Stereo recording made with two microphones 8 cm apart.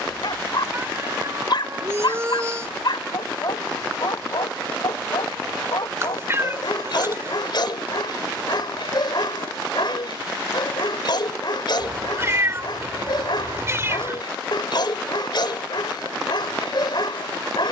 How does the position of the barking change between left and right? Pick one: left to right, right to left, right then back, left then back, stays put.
stays put.